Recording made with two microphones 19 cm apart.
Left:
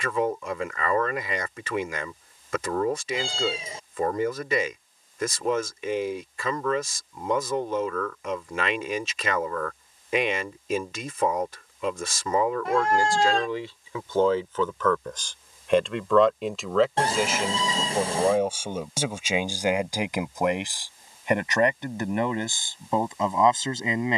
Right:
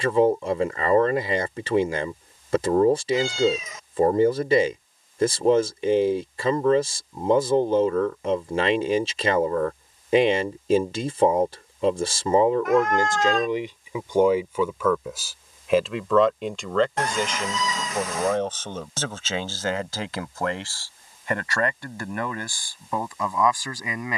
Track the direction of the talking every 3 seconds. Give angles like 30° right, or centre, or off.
30° right, 30° right, 30° right, 30° right, 20° right, centre, 10° left, 20° left.